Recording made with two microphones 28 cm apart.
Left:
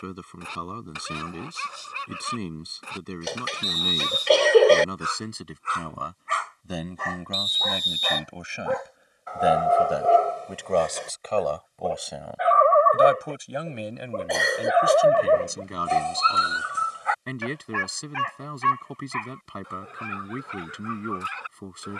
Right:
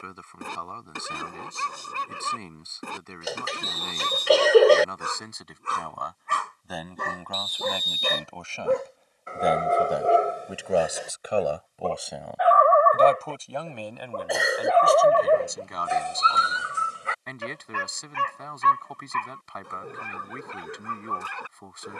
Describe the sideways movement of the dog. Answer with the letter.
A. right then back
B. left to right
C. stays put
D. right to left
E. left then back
E.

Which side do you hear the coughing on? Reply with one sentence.
You can hear the coughing in the centre.